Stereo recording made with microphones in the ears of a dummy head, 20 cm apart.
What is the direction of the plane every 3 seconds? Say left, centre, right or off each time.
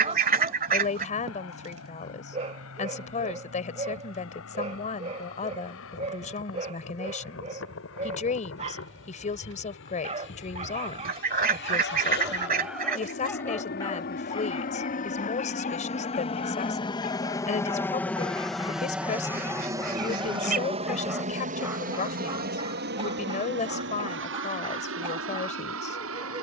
left, left, left, left, left, left, centre, right, right.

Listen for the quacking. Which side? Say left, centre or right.
right.